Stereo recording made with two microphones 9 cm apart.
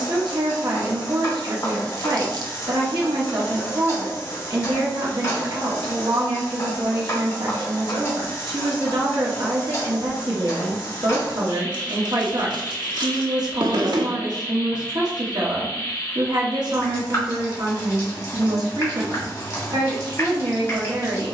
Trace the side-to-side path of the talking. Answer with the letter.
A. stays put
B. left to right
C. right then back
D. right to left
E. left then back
A.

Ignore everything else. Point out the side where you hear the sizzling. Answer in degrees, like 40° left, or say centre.
30° left.